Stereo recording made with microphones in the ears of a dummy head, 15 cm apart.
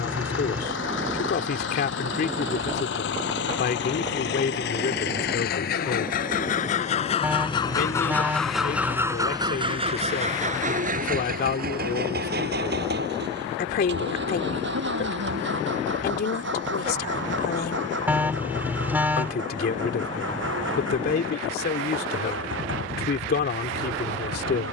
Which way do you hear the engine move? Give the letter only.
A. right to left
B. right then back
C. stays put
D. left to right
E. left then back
D.